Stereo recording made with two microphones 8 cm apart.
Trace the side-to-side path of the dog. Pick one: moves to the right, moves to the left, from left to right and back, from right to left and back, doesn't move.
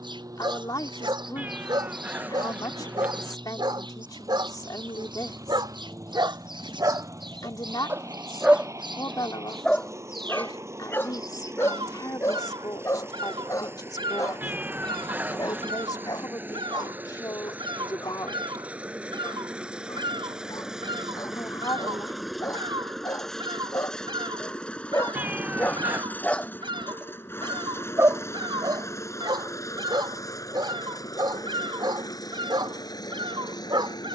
from right to left and back.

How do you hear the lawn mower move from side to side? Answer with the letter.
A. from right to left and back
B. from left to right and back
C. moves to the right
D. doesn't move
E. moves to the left
E.